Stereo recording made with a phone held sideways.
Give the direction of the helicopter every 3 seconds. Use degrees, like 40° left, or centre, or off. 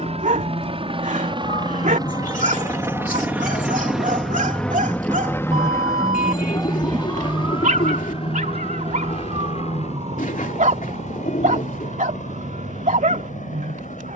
30° right, centre, 40° left, 50° left, 60° left.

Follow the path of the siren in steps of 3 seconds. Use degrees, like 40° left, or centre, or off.
50° left, 20° left, 20° right, 50° right, 60° right.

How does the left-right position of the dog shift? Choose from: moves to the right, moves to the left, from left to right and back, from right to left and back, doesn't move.
doesn't move.